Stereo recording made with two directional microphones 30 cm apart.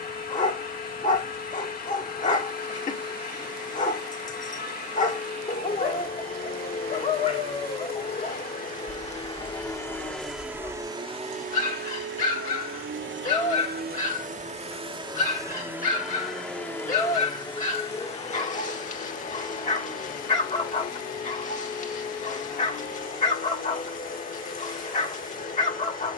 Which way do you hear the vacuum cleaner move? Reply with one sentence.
You can hear the vacuum cleaner go right and come back.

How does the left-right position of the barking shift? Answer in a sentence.
In this clip you hear the barking stay put.